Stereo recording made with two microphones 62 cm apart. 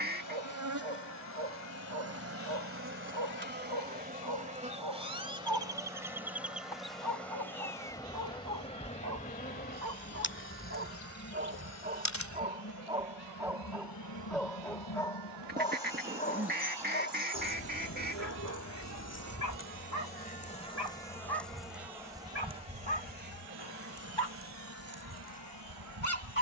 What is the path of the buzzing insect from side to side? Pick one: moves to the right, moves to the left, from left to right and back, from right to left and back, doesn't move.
from right to left and back.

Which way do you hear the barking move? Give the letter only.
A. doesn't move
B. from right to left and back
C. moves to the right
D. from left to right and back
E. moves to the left
E.